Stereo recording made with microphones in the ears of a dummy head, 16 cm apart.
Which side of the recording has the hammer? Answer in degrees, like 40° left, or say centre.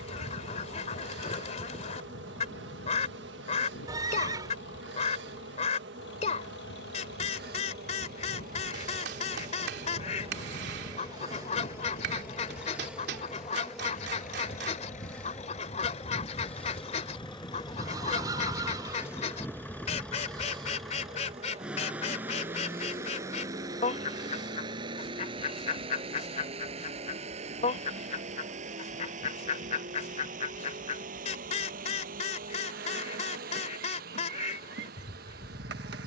70° right.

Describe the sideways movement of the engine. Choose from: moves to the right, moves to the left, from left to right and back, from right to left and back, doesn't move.
moves to the right.